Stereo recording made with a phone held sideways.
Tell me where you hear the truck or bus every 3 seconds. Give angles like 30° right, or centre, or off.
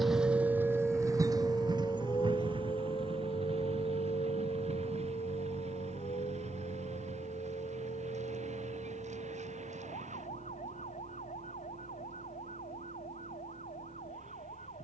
30° right, 50° right, 60° right, 60° right, 70° right.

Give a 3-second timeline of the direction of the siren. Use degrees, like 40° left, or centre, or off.
10° left, 60° left, 70° left, 70° left, 70° left.